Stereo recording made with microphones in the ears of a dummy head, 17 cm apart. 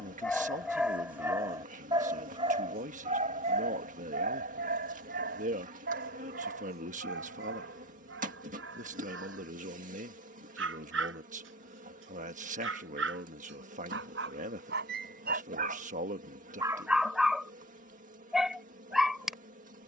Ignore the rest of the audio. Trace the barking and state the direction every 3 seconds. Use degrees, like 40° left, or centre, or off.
10° right, 40° right, 60° right, 60° right, 60° right, 20° right, centre.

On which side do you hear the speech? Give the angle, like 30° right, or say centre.
40° right.